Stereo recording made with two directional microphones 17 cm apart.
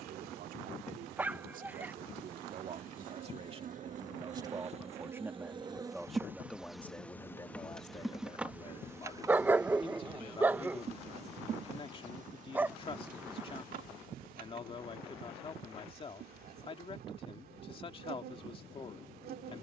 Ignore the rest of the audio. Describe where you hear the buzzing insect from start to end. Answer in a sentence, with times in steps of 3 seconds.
You can hear the buzzing insect on the right from 0 s, in the centre from 6 s and on the right from 9 s.